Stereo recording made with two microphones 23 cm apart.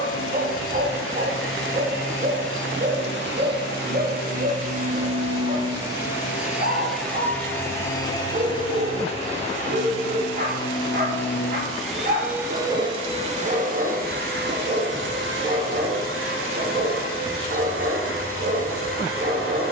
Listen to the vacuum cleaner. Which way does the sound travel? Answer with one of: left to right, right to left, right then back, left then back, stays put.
left then back.